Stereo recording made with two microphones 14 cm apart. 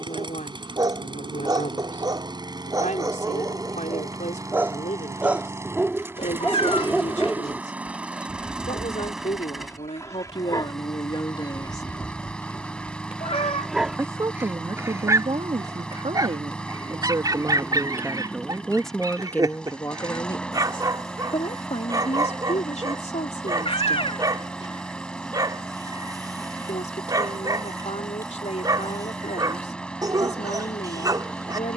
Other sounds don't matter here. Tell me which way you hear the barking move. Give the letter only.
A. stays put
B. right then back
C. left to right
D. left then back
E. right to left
D.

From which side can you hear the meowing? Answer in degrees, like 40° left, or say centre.
40° left.